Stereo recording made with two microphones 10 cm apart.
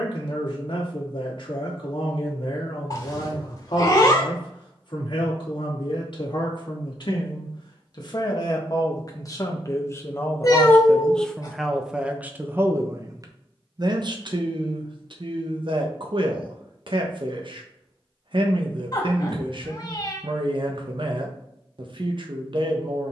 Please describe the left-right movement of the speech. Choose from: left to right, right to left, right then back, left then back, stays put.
left to right.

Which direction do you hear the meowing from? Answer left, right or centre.
left.